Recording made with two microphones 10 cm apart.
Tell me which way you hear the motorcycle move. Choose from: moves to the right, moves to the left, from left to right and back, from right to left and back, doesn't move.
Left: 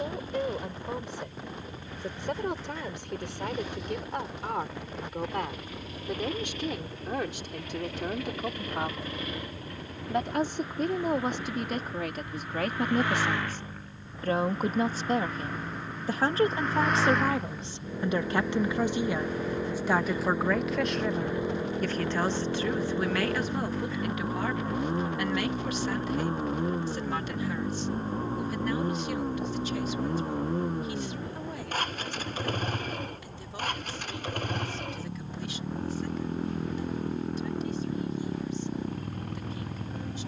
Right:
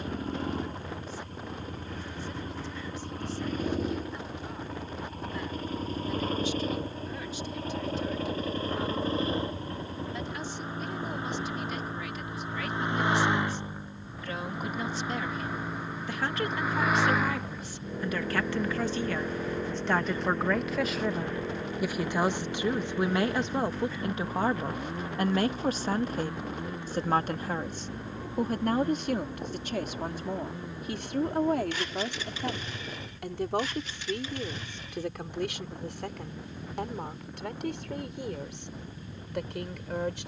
moves to the left.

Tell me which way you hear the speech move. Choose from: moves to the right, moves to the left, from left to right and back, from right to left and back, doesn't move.
moves to the right.